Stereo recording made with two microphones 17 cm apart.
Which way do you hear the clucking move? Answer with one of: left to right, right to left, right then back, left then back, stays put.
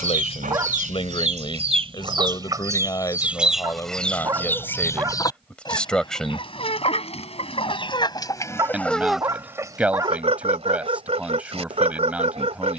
left then back.